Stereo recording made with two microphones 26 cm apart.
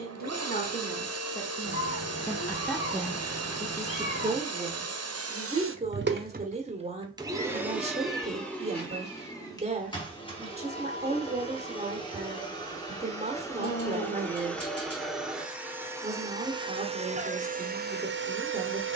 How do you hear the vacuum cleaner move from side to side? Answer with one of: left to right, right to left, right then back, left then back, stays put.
left then back.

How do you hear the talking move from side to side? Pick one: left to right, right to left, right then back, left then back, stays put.
left to right.